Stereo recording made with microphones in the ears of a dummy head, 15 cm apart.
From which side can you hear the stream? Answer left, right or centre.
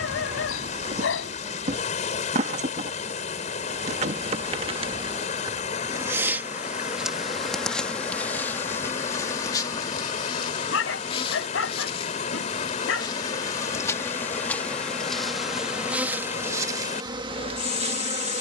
left.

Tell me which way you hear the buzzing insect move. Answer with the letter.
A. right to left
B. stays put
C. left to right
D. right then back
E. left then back
E.